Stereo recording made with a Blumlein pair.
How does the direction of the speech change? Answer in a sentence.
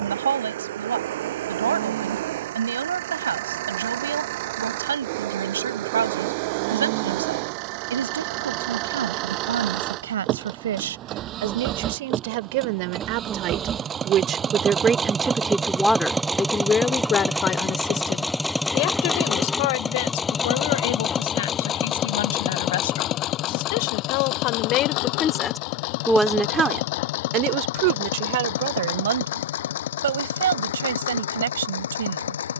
In this clip you hear the speech move from right to left and back again.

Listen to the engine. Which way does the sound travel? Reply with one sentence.
In this clip you hear the engine go from the right side to the left.